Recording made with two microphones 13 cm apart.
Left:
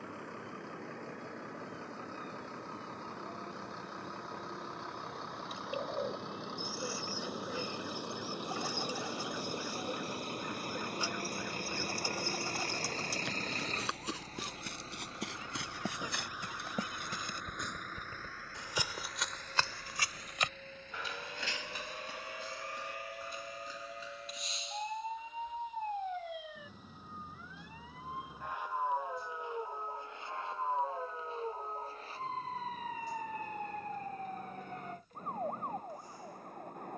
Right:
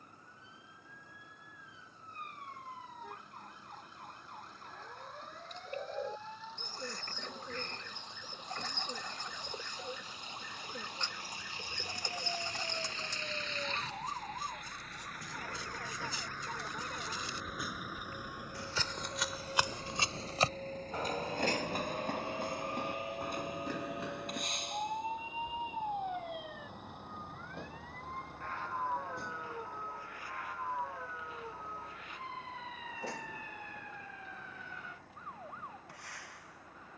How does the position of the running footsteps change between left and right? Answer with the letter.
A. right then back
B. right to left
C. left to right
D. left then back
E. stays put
C.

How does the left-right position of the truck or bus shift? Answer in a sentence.
You can hear the truck or bus move from left to right.